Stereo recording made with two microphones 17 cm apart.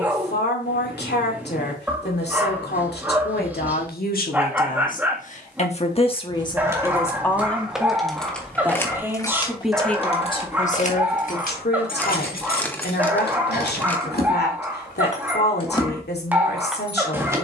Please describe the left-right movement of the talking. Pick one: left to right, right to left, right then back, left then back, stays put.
right then back.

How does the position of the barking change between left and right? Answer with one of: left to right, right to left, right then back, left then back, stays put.
stays put.